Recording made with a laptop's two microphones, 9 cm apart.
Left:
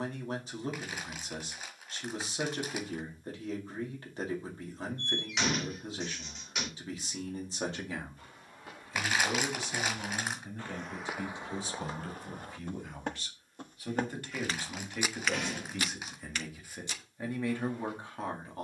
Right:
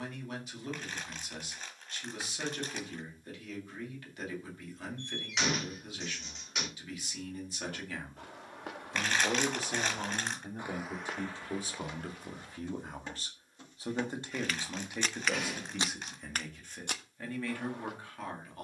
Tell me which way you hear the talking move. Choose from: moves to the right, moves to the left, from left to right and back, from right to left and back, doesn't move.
from left to right and back.